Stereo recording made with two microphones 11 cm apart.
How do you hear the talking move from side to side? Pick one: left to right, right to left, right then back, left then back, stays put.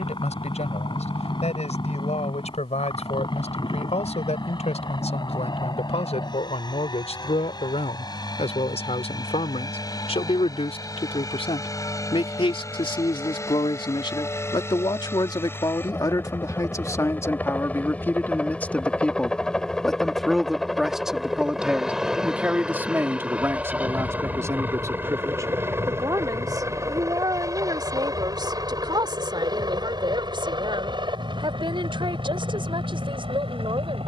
left to right.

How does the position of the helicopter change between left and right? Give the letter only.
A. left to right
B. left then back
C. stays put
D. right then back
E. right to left
A.